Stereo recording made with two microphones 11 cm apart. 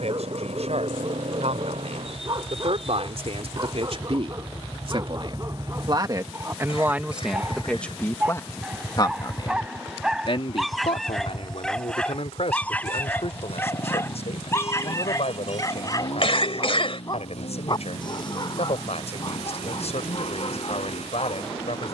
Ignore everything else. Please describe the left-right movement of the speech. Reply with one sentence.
You can hear the speech travel towards the left.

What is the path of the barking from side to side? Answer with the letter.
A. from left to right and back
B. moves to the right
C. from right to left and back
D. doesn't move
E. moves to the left
E.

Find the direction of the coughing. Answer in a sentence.
In this clip you hear the coughing on the left.